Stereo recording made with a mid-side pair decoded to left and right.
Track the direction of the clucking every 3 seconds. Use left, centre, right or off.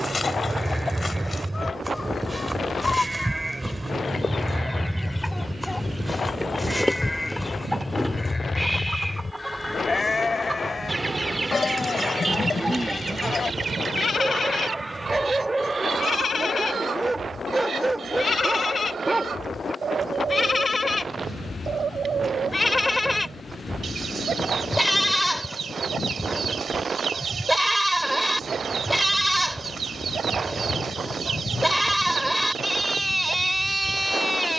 left, left, centre, right, right, right, right, right, right, right, right, right.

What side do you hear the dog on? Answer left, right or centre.
right.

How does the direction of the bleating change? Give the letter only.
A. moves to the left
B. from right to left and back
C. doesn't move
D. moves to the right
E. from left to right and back
B.